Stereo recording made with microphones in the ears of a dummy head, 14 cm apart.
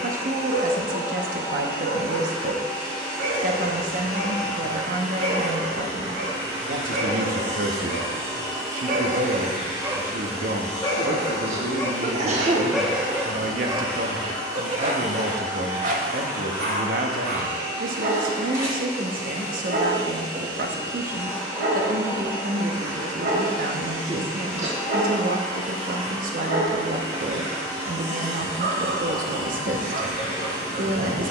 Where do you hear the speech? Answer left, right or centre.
right.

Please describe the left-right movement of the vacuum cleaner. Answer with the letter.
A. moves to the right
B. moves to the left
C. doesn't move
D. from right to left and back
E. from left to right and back
C.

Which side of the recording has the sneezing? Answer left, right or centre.
right.